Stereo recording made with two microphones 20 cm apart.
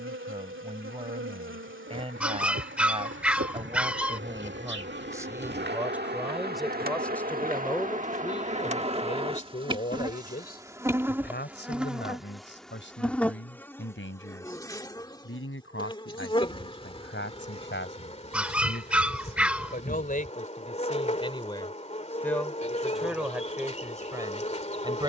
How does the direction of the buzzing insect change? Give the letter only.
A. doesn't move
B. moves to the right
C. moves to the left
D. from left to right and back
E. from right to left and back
C.